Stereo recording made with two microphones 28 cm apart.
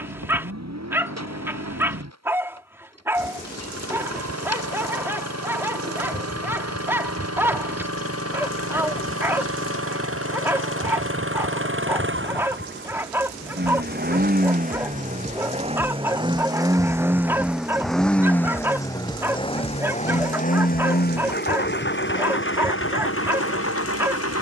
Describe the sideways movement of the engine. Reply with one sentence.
In this clip you hear the engine go from the right side to the left.